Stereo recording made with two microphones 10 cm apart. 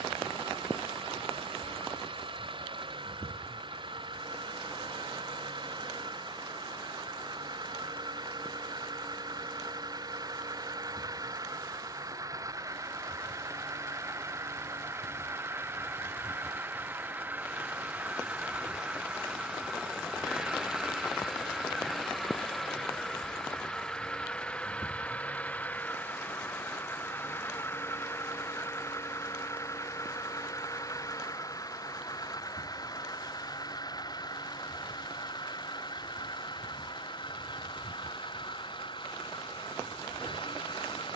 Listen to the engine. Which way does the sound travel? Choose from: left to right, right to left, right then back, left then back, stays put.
right to left.